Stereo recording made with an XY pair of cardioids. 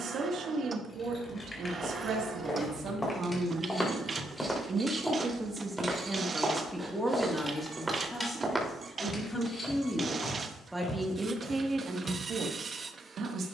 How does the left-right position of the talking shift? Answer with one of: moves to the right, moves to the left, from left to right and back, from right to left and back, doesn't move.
from right to left and back.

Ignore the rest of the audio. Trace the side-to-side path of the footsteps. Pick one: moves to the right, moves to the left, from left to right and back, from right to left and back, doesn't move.
from left to right and back.